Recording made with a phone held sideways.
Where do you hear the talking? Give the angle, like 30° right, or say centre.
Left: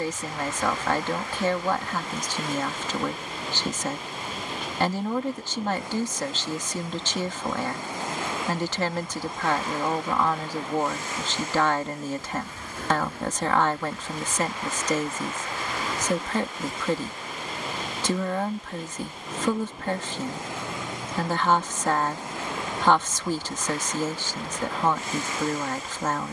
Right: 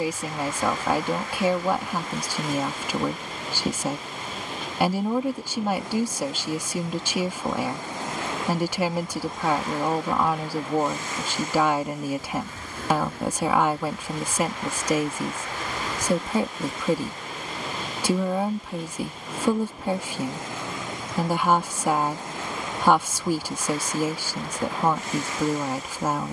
10° right.